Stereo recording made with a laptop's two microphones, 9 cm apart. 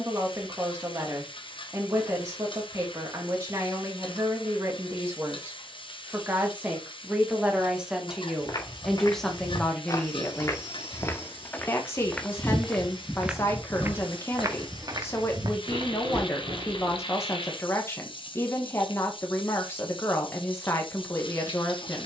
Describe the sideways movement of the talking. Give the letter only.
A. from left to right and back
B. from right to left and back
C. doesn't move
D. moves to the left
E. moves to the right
D.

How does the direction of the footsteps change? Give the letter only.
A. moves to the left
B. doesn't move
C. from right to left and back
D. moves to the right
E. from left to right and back
D.